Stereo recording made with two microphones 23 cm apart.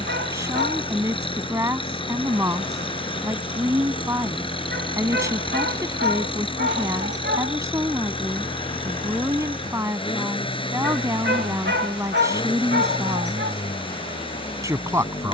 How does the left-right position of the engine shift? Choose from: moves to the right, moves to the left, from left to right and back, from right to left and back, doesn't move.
doesn't move.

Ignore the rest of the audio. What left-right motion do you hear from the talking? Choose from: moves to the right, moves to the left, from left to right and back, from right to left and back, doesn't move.
doesn't move.